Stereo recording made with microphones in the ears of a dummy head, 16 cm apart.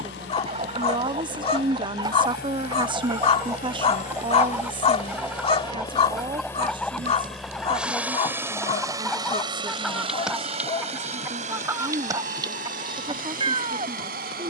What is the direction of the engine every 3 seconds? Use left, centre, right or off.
left, left, centre, right, right.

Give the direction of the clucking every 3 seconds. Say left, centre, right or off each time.
right, centre, centre, centre, right.